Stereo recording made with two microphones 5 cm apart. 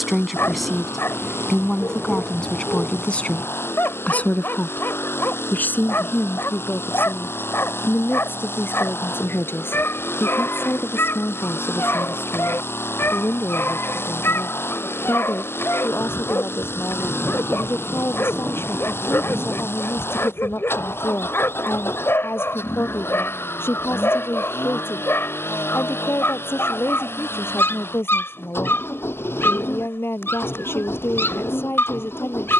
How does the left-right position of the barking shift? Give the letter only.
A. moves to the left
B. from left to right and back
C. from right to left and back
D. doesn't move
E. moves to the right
D.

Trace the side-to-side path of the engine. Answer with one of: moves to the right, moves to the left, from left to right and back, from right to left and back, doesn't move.
doesn't move.